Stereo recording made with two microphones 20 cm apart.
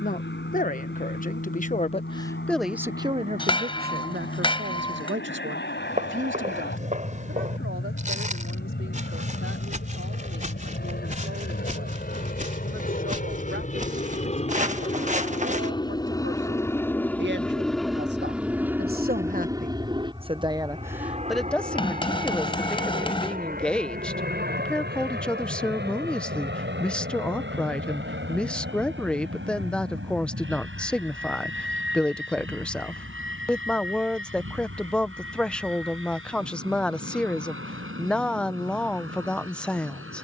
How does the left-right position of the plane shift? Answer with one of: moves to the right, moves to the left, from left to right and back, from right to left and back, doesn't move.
moves to the right.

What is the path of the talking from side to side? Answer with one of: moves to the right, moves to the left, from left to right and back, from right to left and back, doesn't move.
from left to right and back.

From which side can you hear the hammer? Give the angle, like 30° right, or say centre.
30° left.